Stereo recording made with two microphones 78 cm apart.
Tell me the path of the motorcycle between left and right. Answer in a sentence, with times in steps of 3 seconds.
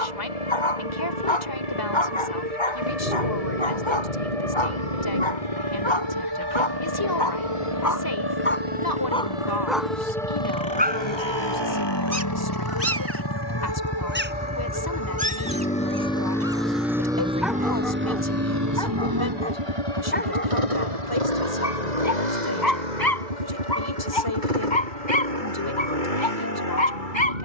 You can hear the motorcycle on the left from 0 s, in the centre from 15 s and on the right from 18 s.